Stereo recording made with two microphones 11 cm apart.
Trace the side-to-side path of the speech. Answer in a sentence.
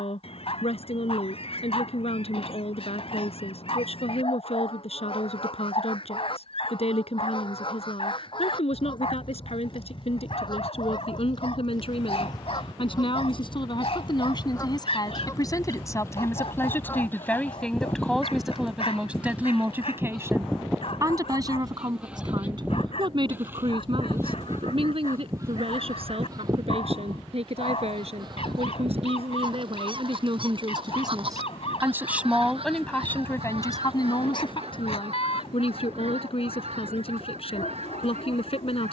You can hear the speech move from left to right and back again.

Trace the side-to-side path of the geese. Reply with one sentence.
You can hear the geese go from the left side to the right.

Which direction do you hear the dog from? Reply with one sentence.
You can hear the dog on the left.